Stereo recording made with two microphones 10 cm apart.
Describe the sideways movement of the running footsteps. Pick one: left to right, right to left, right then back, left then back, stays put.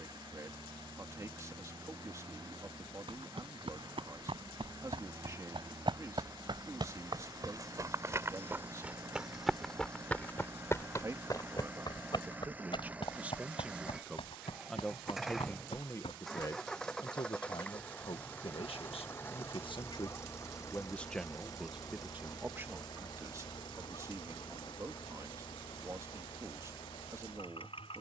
right to left.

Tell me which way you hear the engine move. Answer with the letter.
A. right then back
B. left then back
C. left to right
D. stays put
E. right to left
E.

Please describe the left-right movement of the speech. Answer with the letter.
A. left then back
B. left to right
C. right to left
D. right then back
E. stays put
A.